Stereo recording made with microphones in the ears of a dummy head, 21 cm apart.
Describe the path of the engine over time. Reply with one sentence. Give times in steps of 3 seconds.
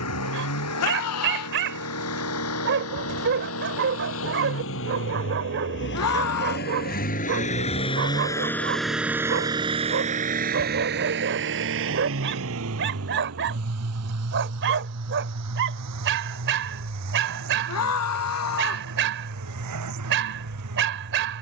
In this clip you hear the engine on the left from 0 s and on the right from 9 s.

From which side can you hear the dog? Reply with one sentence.
You can hear the dog on the right.